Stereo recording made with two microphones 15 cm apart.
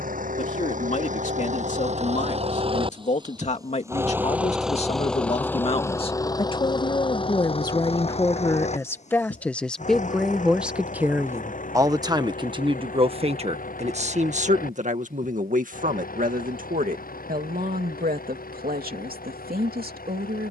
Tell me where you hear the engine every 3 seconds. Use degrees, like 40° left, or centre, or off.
50° right, 10° right, 40° left, 60° left, 60° left, 70° left, 70° left.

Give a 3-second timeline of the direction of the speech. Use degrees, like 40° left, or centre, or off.
50° left, 50° left, 30° left, centre, 40° right, 60° right, 80° right.